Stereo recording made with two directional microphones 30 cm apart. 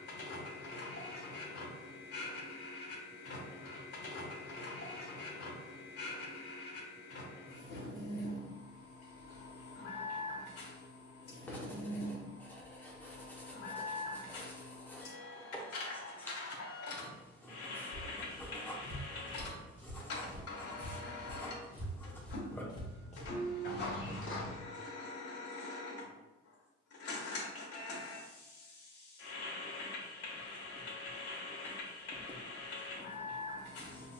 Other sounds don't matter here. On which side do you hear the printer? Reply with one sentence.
In this clip you hear the printer on the left.